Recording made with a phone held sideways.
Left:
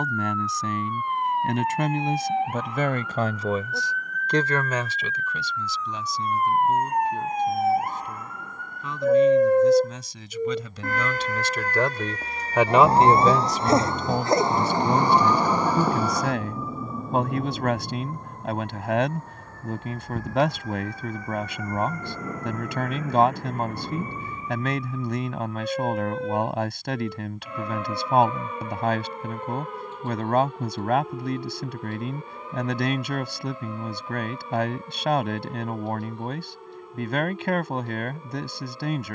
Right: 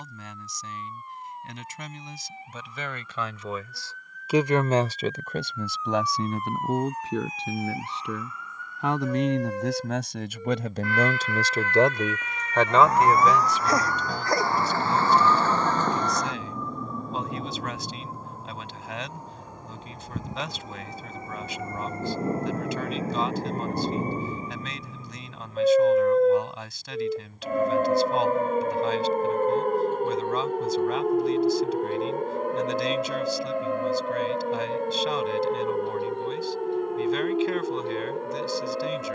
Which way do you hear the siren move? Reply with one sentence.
In this clip you hear the siren move to the right.